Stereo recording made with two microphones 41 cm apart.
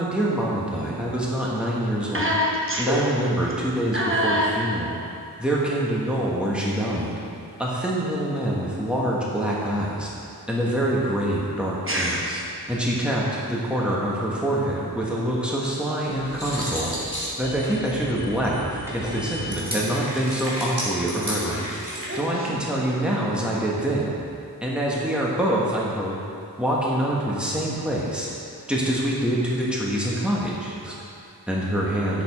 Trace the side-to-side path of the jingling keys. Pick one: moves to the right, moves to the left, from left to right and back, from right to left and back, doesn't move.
moves to the right.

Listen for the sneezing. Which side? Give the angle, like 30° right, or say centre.
30° right.